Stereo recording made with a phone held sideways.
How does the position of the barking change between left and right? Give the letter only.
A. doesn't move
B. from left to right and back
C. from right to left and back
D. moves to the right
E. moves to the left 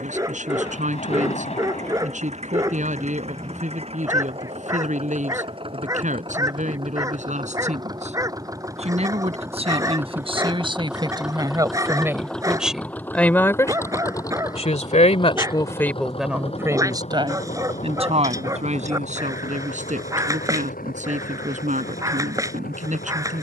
A.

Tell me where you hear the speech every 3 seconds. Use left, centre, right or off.
right, right, right, right, centre, centre, right, right.